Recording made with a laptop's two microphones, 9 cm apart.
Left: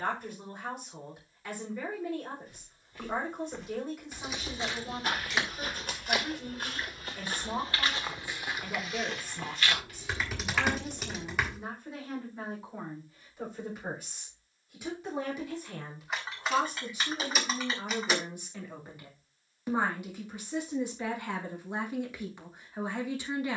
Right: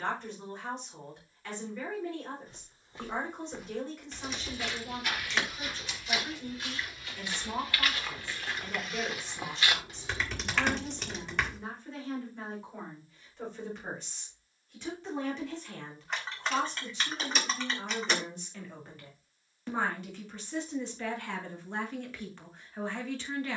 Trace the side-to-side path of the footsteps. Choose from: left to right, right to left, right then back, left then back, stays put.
left then back.